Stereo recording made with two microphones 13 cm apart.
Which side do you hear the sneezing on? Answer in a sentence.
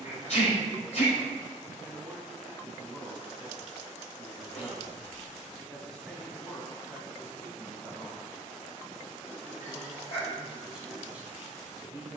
In this clip you hear the sneezing on the left.